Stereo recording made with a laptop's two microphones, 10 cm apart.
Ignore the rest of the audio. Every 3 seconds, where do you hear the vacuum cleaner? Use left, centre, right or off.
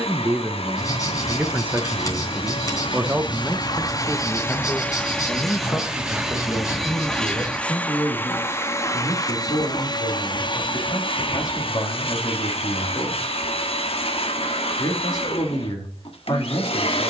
left, left, centre, left, left, left.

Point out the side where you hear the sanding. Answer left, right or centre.
left.